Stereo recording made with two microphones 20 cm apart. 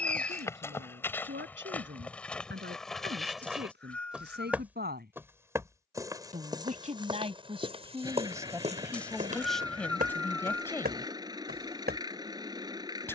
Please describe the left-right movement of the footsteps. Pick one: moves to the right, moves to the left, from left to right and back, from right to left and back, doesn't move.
moves to the right.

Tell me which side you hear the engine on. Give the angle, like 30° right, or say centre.
20° right.